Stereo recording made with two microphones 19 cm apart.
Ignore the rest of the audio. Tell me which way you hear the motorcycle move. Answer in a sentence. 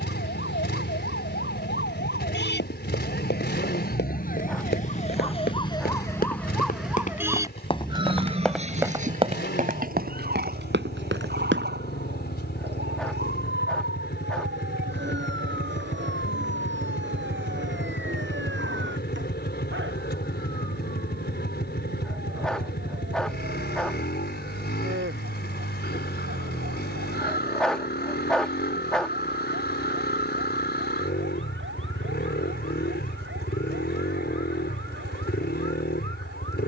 You can hear the motorcycle stay put.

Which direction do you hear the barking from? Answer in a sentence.
In this clip you hear the barking in the centre.